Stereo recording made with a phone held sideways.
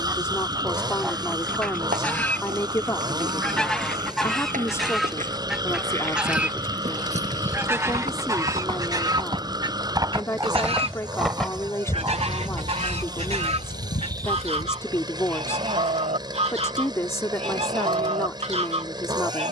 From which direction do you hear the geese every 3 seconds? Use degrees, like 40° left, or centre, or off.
centre, centre, 10° right, 30° right, 40° right, 40° right, 40° right.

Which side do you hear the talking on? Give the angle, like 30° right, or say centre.
20° left.